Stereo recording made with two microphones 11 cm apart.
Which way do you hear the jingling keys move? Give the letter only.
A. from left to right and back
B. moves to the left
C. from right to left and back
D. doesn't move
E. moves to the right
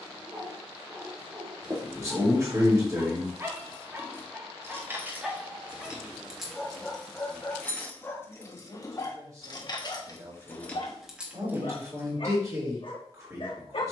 C.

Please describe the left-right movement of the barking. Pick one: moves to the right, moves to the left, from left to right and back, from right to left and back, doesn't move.
moves to the left.